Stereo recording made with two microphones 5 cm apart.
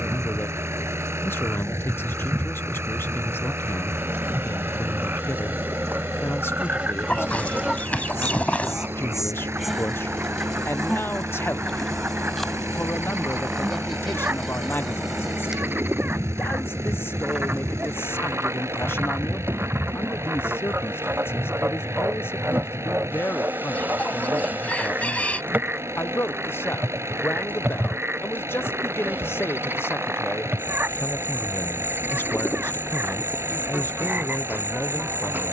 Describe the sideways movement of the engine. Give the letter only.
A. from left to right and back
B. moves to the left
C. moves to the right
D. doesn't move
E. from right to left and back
D.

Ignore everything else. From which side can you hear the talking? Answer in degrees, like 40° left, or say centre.
60° left.